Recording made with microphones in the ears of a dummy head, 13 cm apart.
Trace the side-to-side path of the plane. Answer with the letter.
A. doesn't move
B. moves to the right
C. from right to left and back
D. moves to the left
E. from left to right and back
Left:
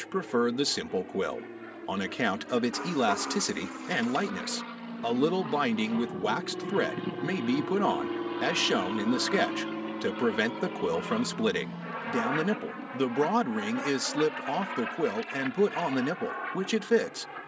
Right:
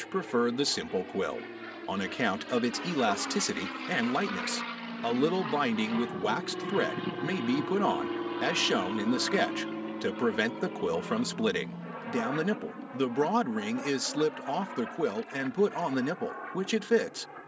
D.